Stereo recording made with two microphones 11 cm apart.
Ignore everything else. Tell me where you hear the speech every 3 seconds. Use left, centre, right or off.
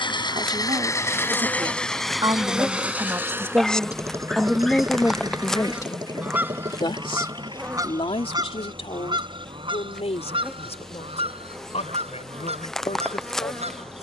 right, centre, left, left, left.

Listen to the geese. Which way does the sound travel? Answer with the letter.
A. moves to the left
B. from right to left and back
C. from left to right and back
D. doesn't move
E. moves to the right
E.